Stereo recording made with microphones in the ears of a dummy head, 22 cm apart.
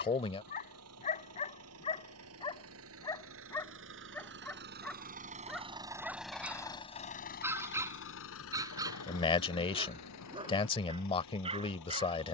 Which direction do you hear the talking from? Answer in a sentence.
In this clip you hear the talking on the left.